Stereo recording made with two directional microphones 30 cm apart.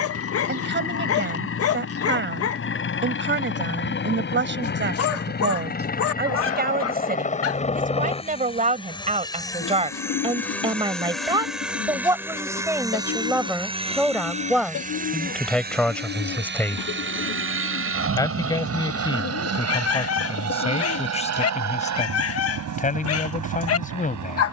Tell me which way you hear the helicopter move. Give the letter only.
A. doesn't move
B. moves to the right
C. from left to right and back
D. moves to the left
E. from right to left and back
B.